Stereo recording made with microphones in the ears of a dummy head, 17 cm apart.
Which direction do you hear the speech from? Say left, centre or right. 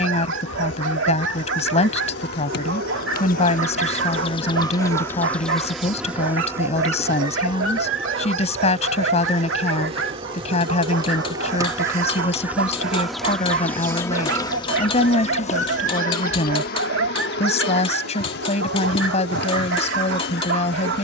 left.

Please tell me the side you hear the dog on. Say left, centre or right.
right.